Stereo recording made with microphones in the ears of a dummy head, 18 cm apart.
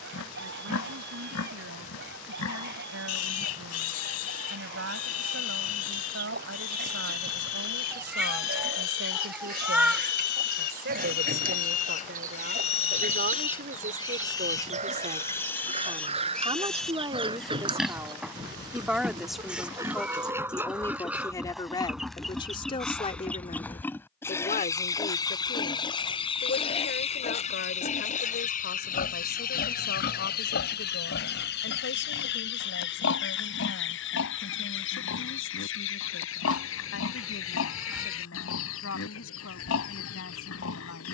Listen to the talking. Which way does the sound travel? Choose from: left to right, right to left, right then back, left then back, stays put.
right to left.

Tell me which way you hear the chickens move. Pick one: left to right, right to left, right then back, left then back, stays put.
right to left.